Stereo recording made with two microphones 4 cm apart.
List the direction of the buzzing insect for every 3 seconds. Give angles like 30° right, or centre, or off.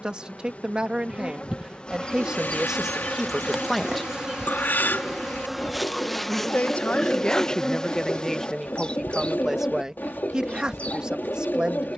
30° left, centre, 10° left, 30° left.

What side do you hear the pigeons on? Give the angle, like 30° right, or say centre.
50° left.